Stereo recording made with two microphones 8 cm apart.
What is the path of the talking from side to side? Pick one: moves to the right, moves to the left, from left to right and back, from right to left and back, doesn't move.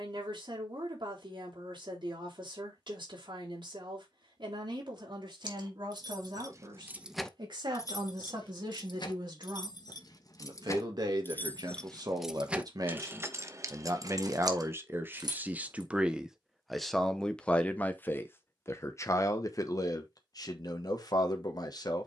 moves to the left.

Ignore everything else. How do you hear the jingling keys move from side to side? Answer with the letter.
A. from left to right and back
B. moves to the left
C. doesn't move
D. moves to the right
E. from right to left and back
E.